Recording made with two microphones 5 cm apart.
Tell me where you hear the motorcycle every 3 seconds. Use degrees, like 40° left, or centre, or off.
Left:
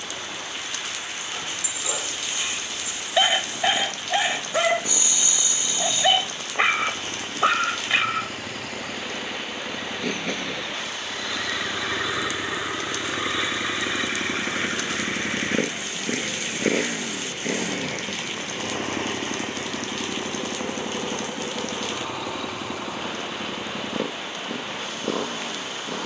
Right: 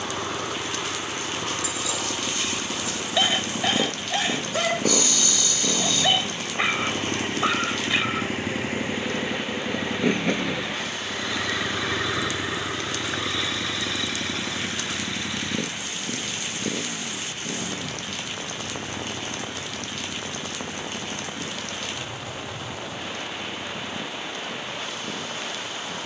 50° right, 50° right, 30° right, 10° right, 20° left, 50° left, 70° left, 80° left, 80° left.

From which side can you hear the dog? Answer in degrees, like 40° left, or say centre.
20° left.